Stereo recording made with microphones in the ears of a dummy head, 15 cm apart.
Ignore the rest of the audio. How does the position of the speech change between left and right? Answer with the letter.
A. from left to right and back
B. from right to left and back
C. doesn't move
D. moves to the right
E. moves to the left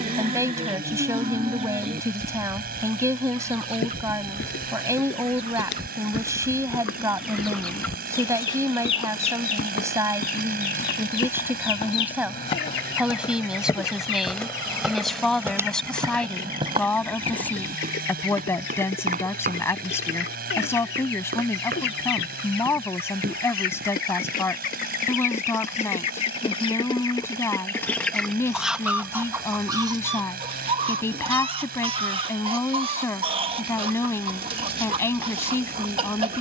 E.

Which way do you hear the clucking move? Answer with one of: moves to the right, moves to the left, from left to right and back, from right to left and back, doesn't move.
from right to left and back.